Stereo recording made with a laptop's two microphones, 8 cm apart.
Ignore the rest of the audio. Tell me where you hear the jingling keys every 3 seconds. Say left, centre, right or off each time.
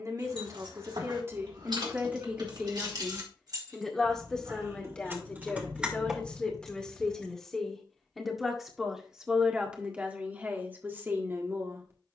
right, right, centre, off.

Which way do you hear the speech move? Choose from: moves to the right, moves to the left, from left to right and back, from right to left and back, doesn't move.
from right to left and back.